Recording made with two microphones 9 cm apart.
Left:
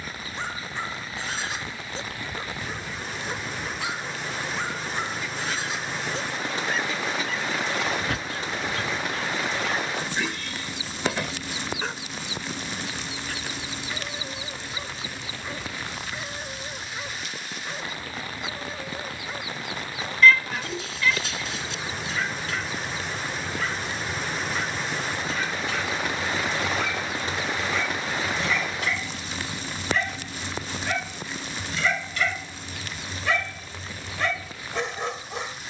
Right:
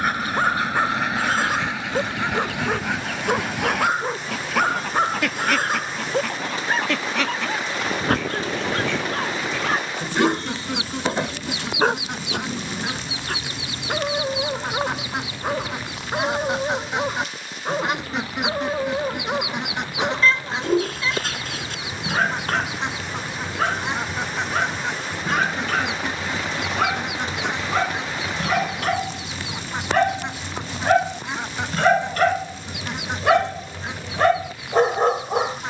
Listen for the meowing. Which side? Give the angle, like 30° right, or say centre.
30° right.